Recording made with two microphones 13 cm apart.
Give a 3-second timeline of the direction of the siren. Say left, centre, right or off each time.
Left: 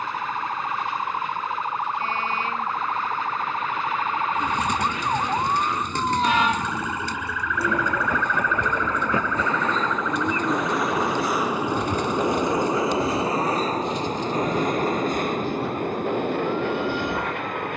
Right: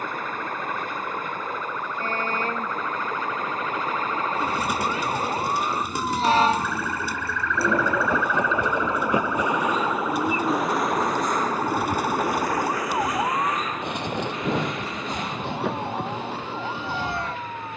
left, left, centre, right, right, right.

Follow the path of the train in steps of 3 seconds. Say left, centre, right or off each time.
right, right, right, centre, left, left.